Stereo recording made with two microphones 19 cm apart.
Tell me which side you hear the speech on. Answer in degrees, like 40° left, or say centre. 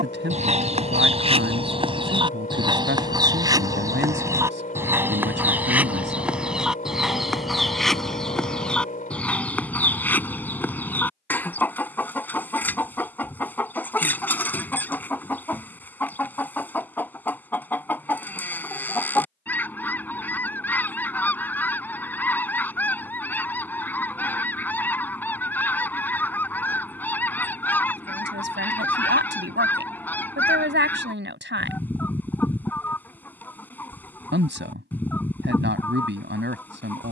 80° right.